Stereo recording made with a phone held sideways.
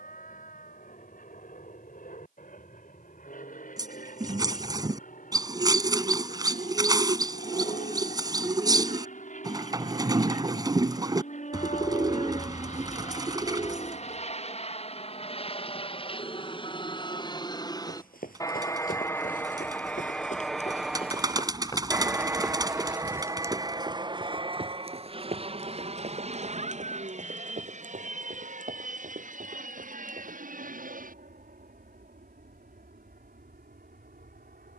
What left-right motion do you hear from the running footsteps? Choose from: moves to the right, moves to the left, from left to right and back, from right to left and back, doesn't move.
moves to the right.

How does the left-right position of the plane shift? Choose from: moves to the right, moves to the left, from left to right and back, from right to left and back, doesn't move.
moves to the right.